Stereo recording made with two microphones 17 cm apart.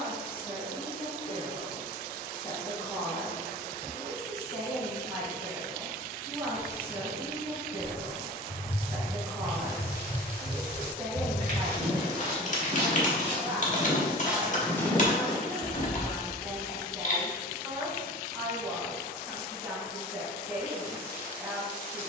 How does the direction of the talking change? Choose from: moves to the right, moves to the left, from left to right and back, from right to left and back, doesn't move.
moves to the right.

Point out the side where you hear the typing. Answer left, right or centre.
left.